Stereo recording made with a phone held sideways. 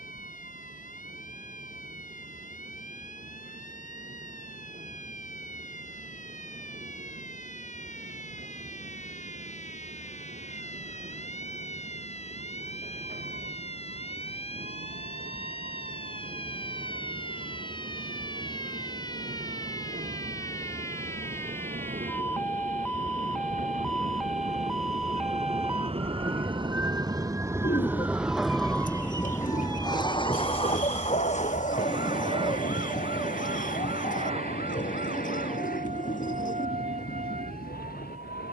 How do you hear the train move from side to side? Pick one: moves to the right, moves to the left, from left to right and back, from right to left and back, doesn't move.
moves to the left.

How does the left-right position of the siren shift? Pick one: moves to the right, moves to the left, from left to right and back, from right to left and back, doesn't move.
moves to the right.